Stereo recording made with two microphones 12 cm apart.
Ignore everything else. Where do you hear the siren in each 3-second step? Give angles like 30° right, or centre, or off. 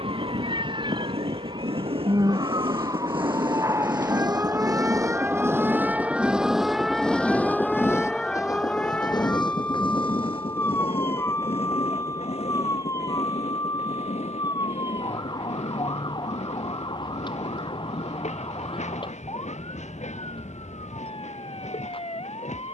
40° right, 20° right, centre, 20° left, 30° left, 40° left, 40° left, 50° left.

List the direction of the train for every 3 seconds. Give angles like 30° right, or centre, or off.
60° right, 40° right, 10° left, 50° left, 60° left, 70° left, 70° left, 80° left.